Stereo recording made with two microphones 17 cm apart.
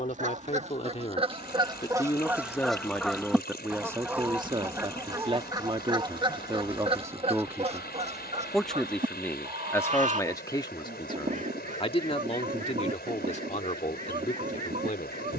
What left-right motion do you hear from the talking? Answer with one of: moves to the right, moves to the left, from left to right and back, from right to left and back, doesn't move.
from left to right and back.